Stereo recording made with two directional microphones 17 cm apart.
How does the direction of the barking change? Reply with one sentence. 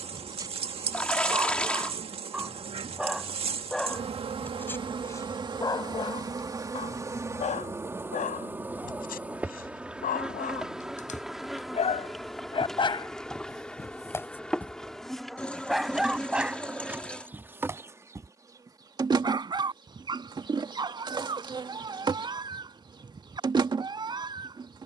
You can hear the barking move from right to left and back again.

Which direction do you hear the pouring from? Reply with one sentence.
In this clip you hear the pouring in the centre.